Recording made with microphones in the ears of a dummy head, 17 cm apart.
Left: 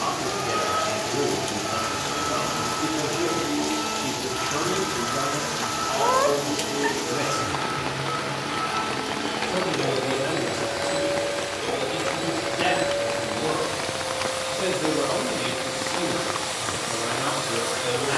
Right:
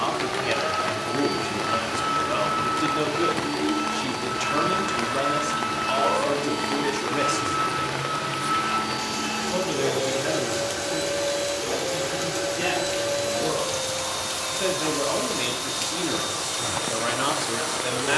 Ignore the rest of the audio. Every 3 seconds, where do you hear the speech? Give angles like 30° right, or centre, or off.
70° right, 70° right, 70° right, centre, centre, 40° right.